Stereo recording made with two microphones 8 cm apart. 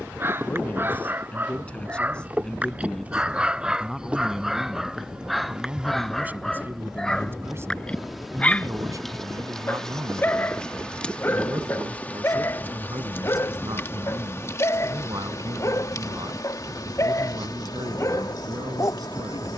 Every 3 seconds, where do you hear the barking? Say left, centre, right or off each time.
right, centre, centre, left, left, left, left.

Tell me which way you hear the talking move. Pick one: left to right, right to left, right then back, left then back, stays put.
left to right.